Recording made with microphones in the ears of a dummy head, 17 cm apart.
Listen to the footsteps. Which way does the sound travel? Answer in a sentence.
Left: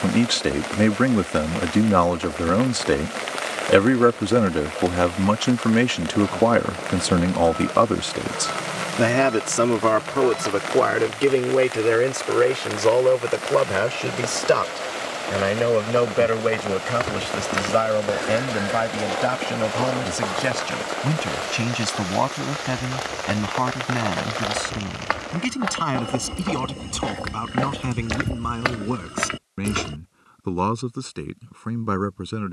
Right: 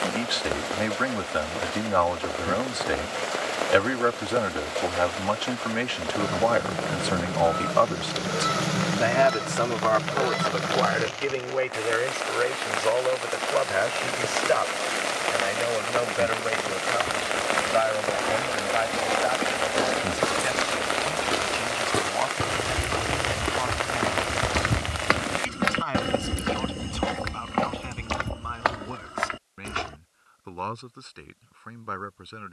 You can hear the footsteps go right and come back.